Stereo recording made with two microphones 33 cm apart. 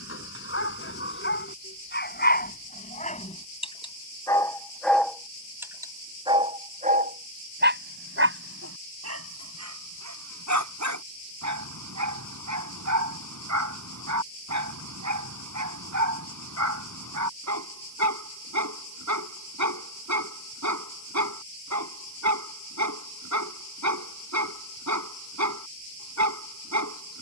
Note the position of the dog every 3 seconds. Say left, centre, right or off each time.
left, centre, right, right, right, right, right, right, right.